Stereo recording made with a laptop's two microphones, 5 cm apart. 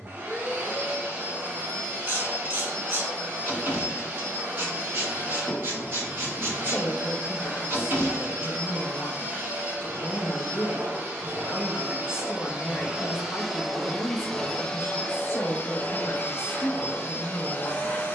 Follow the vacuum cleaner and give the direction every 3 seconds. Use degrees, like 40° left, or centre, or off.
40° right, 40° right, 40° right, 40° right, 10° right, 30° left.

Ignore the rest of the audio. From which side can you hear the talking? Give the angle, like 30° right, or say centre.
50° left.